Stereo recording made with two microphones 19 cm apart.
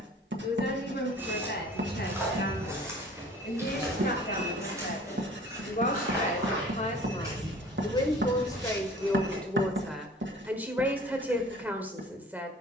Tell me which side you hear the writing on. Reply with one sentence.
In this clip you hear the writing on the right.